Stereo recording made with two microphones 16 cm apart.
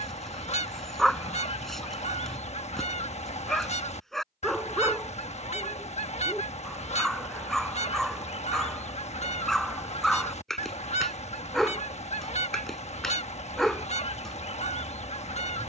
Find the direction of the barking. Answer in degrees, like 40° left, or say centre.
centre.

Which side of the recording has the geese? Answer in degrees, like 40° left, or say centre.
40° left.